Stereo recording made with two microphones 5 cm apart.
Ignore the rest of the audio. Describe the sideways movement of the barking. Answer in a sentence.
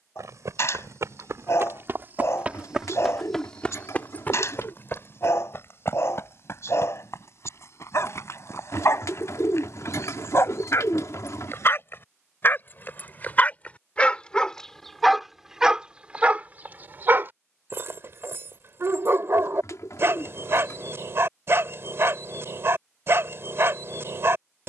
In this clip you hear the barking move to the right.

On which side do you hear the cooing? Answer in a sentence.
You can hear the cooing on the left.